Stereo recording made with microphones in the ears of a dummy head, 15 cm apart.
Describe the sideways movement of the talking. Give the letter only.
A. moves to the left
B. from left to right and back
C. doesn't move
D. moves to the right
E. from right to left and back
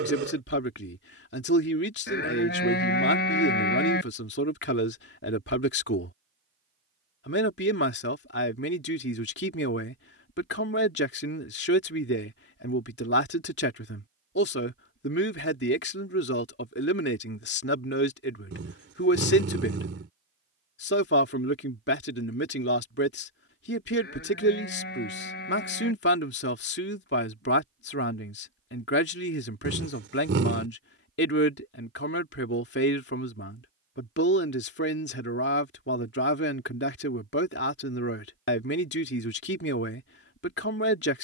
C.